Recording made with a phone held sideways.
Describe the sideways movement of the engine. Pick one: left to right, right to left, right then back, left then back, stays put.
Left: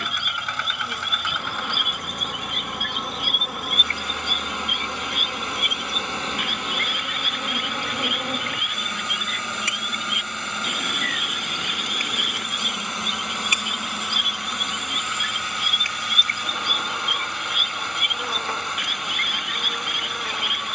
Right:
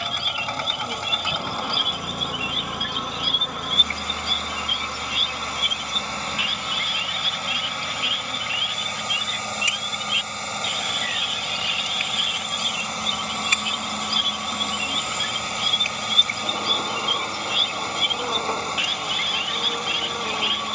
stays put.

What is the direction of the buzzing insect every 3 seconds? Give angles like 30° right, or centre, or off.
10° right, 10° left, 40° left, 50° left, 10° left, 20° right, 20° right.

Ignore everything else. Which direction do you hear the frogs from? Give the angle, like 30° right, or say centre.
50° left.